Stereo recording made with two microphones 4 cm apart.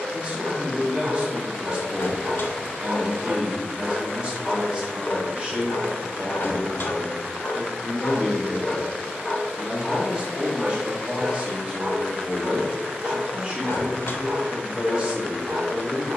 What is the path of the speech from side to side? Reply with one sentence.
In this clip you hear the speech stay in one place.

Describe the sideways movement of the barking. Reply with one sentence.
In this clip you hear the barking move from right to left and back again.